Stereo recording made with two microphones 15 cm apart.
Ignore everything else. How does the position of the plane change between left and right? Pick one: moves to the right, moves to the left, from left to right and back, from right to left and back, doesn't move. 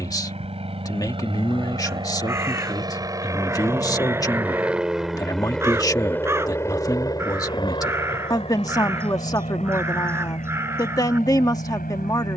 moves to the left.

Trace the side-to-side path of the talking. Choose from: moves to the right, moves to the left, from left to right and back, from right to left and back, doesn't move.
doesn't move.